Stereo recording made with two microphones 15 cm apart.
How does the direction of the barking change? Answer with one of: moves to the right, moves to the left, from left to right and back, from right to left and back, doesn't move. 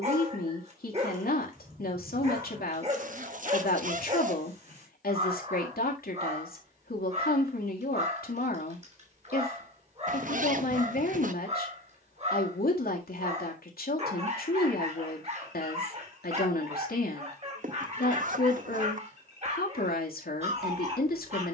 doesn't move.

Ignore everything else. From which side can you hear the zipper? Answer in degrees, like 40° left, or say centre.
60° right.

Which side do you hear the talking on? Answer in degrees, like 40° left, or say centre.
80° left.